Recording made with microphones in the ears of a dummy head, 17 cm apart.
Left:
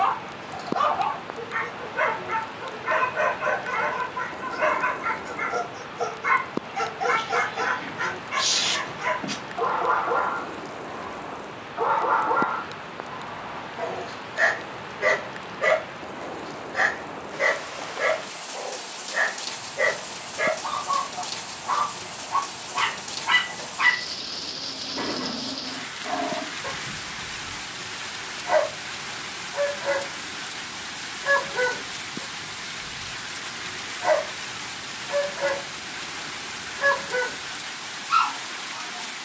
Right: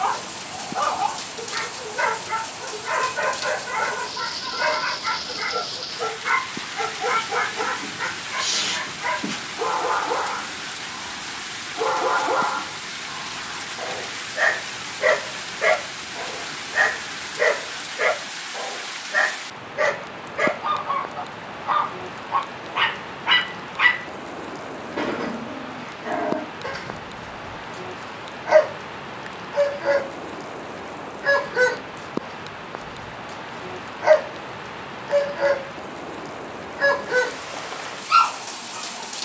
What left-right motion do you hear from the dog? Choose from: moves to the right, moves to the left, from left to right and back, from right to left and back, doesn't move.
moves to the right.